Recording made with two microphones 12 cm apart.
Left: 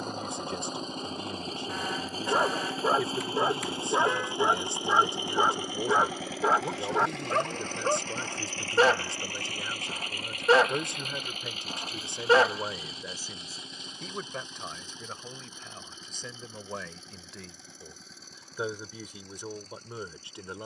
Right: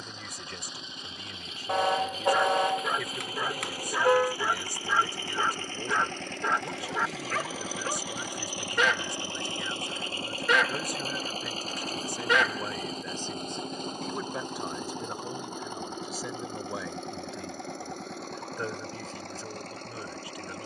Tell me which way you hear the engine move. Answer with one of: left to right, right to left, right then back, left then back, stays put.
left to right.